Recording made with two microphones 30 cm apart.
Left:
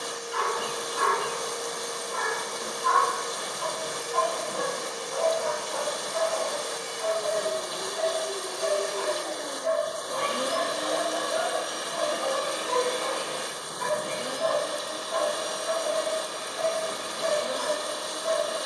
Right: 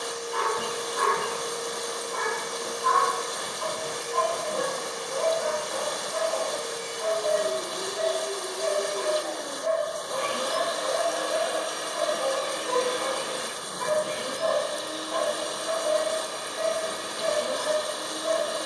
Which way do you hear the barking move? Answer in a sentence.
You can hear the barking stay put.